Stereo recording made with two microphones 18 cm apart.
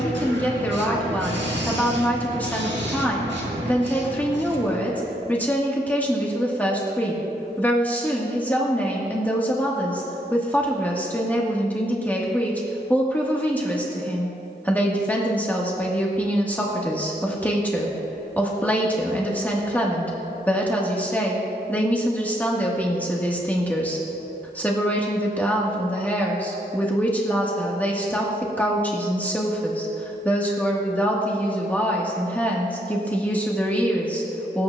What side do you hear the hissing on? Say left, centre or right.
right.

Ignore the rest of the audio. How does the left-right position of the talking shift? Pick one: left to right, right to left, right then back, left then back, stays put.
stays put.